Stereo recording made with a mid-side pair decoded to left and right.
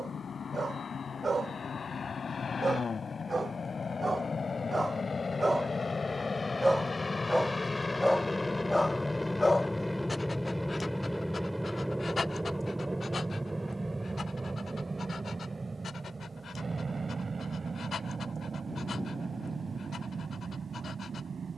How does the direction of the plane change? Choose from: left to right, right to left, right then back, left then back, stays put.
left to right.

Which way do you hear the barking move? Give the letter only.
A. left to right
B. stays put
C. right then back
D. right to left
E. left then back
D.